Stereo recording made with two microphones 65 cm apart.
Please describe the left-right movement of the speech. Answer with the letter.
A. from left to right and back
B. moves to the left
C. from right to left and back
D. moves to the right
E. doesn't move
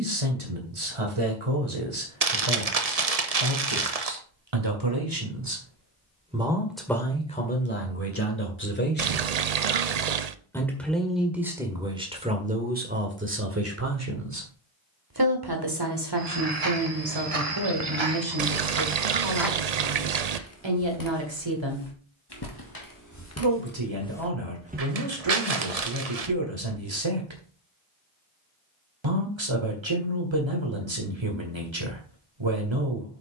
C.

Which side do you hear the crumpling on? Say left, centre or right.
right.